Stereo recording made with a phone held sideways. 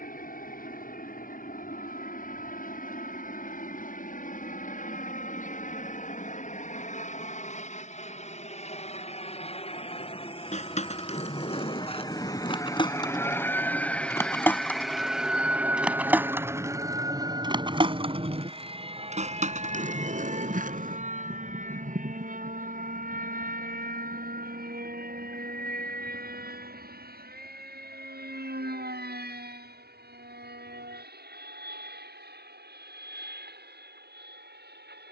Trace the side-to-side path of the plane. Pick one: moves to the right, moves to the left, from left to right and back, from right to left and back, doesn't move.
moves to the right.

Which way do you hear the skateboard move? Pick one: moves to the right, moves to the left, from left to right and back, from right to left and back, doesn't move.
moves to the right.